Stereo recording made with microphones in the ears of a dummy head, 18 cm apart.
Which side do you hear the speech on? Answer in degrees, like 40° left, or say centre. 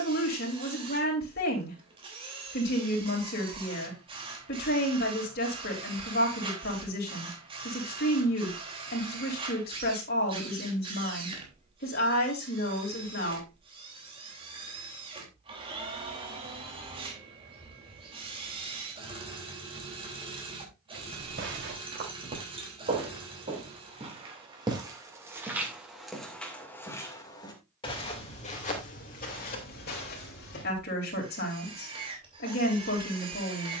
50° left.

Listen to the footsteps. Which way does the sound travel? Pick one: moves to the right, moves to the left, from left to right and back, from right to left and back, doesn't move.
moves to the left.